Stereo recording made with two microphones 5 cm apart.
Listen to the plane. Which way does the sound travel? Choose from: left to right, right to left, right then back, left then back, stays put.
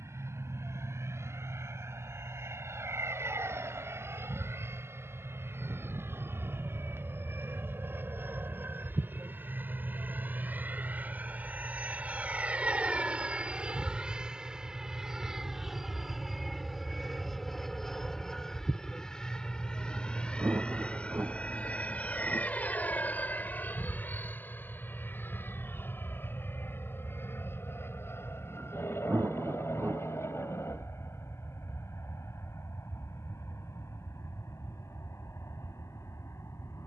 right to left.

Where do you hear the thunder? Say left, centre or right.
right.